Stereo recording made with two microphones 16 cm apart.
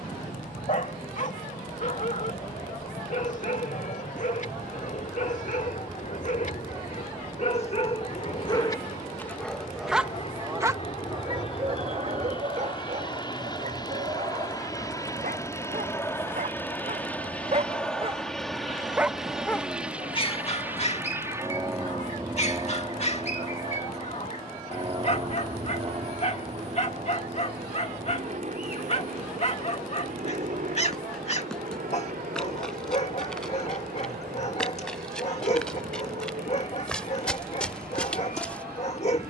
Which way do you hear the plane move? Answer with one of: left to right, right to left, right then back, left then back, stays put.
left to right.